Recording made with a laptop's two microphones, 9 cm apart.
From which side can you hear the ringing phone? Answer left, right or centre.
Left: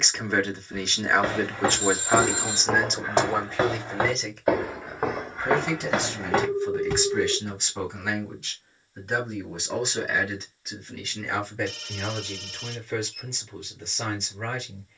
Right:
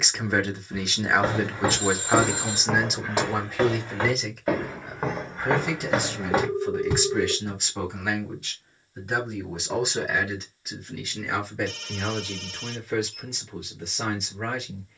right.